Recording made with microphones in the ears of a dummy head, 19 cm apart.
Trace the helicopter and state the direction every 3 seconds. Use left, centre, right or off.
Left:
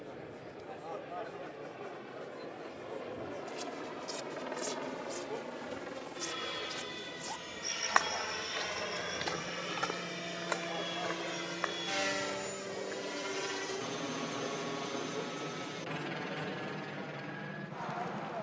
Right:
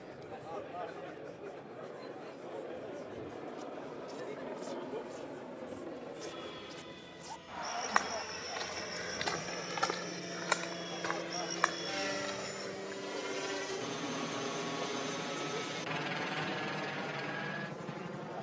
left, left, left, left, centre, right.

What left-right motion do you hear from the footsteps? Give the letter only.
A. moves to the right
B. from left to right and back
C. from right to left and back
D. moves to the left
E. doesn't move
A.